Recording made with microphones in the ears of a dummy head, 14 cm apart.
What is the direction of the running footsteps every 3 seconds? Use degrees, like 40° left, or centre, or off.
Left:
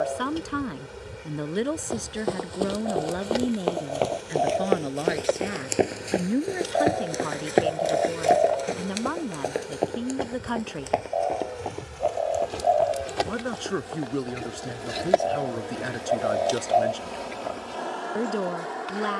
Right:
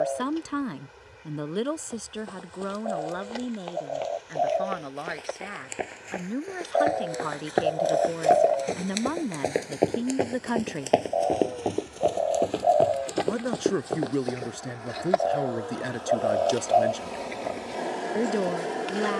80° left, 60° left, 20° left, 30° right, 50° right, off, off.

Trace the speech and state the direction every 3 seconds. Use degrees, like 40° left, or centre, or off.
10° left, 30° left, 10° left, 10° right, 10° right, 10° right, 10° right.